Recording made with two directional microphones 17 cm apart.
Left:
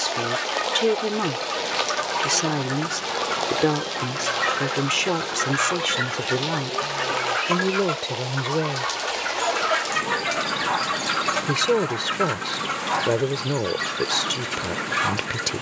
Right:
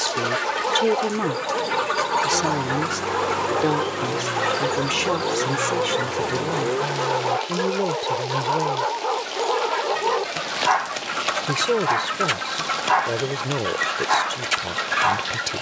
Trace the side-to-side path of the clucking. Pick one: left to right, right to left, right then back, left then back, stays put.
left then back.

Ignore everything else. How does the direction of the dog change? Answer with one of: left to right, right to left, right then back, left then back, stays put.
stays put.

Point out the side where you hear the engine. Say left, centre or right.
right.